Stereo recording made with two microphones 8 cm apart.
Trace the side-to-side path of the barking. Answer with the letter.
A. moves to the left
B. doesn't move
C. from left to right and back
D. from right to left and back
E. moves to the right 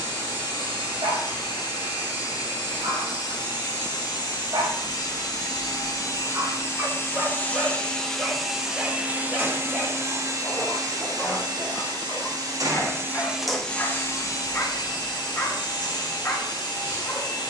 A.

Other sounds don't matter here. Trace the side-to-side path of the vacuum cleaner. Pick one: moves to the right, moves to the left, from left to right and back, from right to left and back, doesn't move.
from left to right and back.